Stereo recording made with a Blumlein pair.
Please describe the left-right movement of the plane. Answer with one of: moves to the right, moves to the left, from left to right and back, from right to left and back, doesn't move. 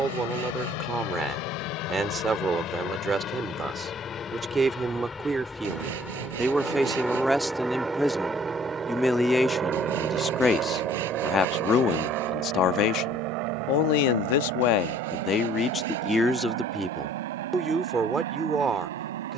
moves to the right.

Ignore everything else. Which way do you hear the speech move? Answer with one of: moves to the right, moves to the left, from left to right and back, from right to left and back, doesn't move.
from right to left and back.